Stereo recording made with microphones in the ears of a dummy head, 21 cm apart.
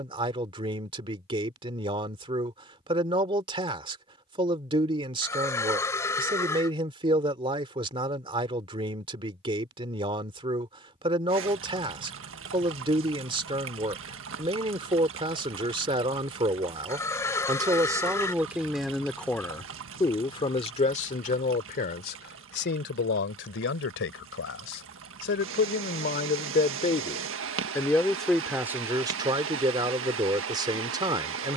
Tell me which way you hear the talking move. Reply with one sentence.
You can hear the talking go left and come back.